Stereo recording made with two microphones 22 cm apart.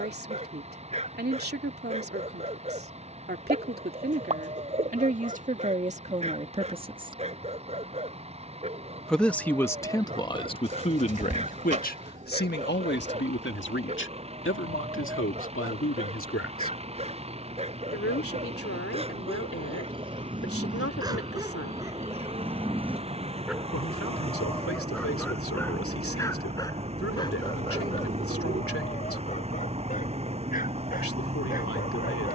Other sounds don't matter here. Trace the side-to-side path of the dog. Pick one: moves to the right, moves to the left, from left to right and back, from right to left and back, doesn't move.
moves to the left.